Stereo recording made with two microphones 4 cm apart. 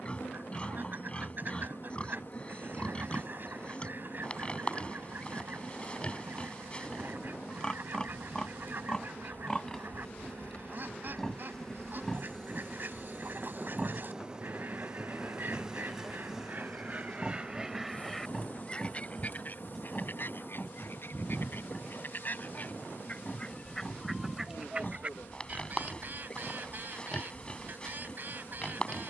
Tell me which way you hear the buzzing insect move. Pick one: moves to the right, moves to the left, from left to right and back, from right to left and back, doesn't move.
from left to right and back.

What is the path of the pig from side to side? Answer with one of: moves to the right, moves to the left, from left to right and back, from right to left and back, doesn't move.
from left to right and back.